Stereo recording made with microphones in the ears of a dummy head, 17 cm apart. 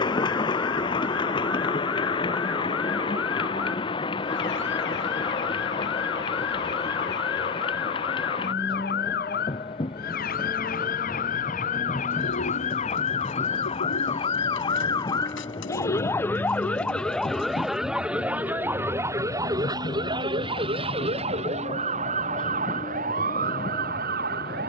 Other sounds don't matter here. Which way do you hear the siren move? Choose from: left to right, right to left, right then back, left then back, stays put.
left to right.